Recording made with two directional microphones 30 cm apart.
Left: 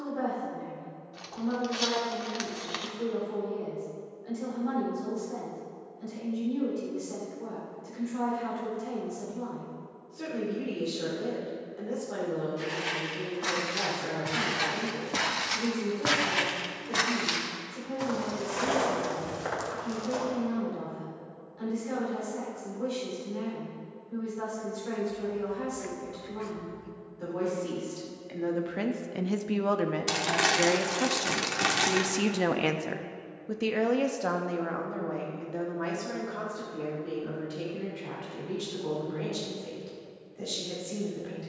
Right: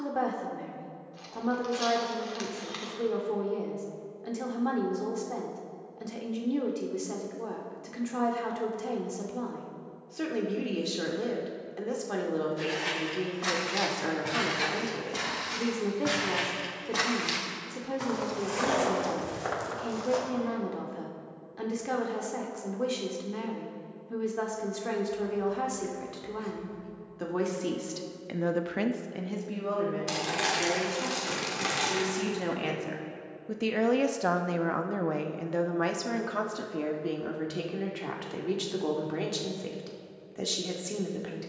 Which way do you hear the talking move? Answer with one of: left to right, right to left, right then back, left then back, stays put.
left then back.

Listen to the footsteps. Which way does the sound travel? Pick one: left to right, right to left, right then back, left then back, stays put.
left then back.